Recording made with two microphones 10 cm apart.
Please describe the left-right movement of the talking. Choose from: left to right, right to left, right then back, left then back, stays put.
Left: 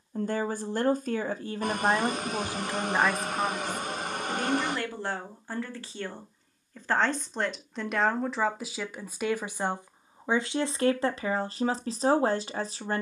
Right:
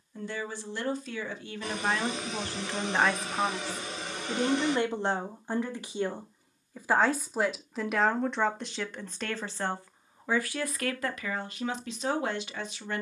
right then back.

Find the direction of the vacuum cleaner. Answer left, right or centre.
left.